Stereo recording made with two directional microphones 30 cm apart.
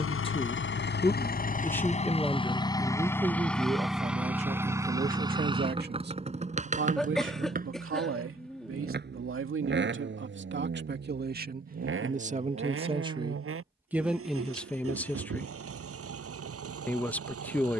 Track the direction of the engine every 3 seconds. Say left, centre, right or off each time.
left, centre, right, right, right, right.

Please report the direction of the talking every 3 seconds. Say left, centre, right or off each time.
centre, right, right, right, centre, centre.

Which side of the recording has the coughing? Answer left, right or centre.
centre.